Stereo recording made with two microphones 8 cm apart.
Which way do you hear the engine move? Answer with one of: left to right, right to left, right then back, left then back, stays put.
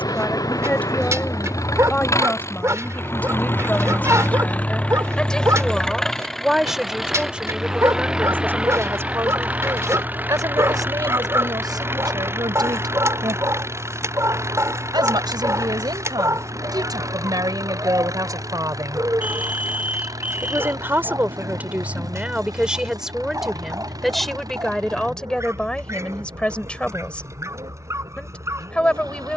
left to right.